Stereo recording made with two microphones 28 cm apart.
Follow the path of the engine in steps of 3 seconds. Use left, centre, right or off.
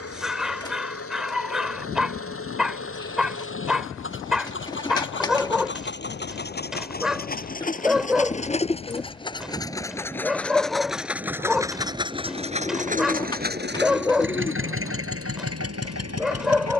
left, left, left, centre, right, right.